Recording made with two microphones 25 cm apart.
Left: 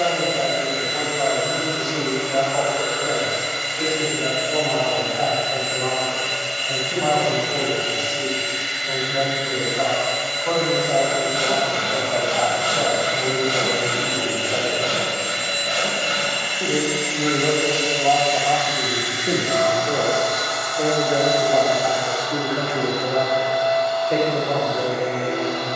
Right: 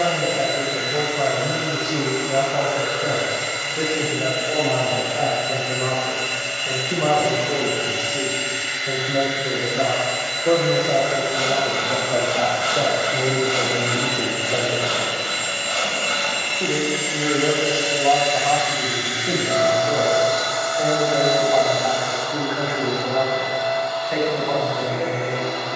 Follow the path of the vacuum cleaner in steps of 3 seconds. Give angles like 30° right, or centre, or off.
40° left, 40° left, 40° left, 40° left, 40° left, 10° left, 30° right, 60° right, 70° right.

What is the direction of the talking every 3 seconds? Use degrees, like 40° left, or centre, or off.
70° right, 60° right, 60° right, 40° right, 30° right, centre, 20° left, 40° left, 50° left.